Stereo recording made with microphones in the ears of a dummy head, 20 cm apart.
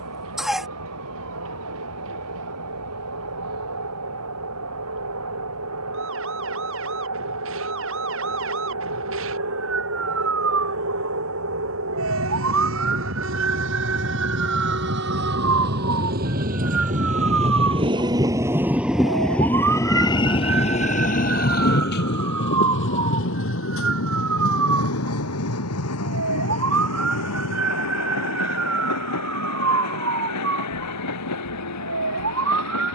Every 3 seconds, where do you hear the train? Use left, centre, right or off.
right, right, right, right, right, right, centre, left, left, left, left.